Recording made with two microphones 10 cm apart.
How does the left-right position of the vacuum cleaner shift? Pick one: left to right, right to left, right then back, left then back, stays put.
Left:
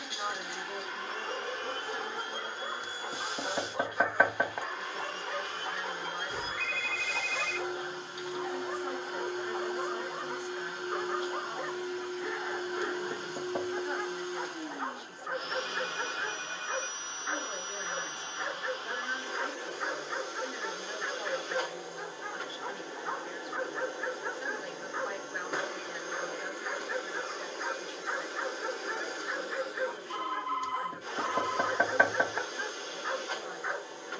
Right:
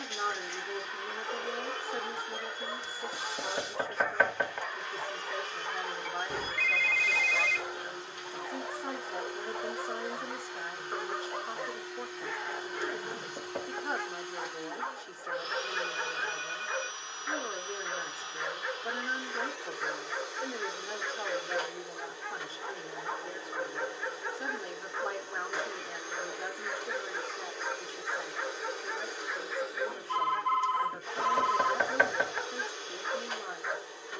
stays put.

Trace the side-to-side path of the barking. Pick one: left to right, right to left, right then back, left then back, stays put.
stays put.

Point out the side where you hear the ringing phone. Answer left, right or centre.
right.